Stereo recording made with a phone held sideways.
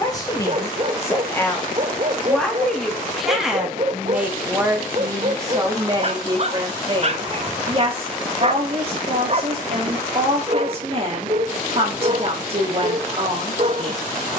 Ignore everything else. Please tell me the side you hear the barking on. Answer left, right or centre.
right.